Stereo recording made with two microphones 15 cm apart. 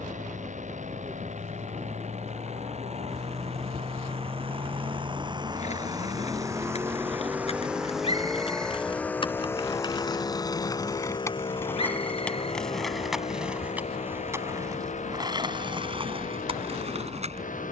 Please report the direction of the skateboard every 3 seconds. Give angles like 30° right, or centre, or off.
off, 50° left, 40° left, 30° left, 10° right, 40° right.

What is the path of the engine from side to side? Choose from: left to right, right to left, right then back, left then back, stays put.
right to left.